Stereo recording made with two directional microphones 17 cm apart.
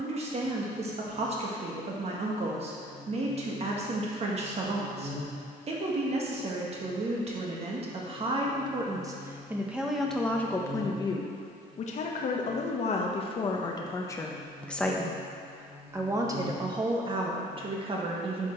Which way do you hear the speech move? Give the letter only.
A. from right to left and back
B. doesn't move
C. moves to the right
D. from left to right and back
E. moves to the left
A.